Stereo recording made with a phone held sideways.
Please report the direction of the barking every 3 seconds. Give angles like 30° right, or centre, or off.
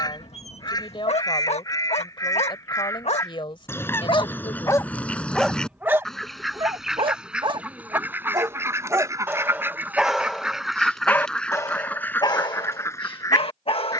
50° left, 20° left, 30° right, centre, 40° left.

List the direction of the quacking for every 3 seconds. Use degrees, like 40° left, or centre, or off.
20° left, 10° left, 10° right, 10° right, 20° left.